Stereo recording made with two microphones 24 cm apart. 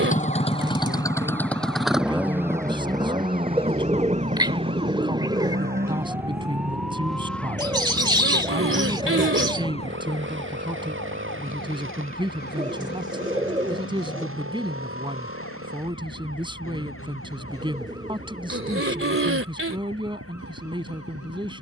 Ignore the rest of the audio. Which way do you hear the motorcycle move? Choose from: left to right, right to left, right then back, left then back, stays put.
left to right.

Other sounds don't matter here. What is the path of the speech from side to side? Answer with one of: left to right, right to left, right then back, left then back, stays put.
stays put.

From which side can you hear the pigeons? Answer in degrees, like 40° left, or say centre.
20° right.